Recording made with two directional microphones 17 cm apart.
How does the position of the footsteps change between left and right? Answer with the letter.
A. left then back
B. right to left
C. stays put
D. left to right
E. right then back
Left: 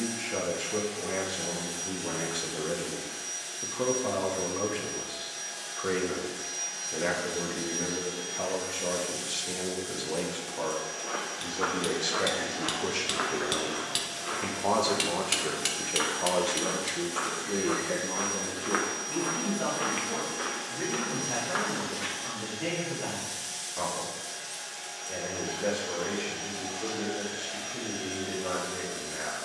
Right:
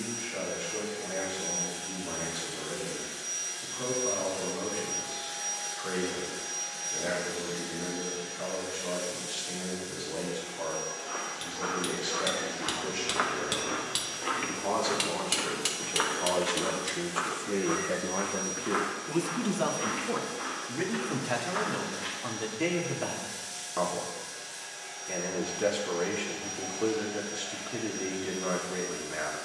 E.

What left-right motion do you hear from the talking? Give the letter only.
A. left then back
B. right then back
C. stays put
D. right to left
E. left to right
E.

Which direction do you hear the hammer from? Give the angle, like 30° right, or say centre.
centre.